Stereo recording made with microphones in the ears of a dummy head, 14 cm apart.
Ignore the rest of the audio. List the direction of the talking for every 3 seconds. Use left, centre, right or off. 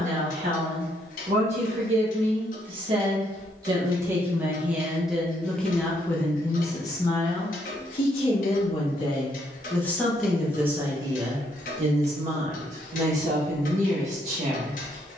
right, centre, left, centre, right.